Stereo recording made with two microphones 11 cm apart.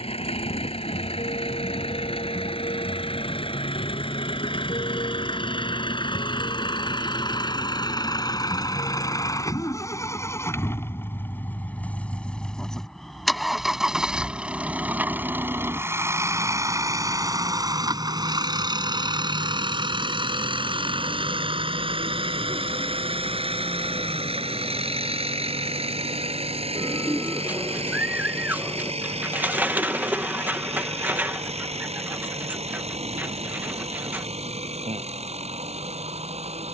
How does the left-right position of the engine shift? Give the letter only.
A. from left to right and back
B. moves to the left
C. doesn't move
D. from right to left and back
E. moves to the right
E.